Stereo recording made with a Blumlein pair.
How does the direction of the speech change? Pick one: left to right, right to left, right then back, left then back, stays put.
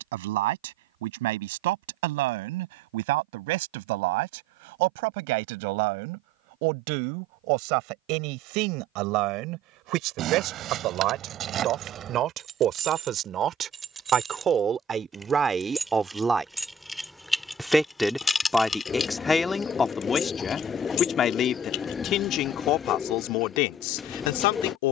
right to left.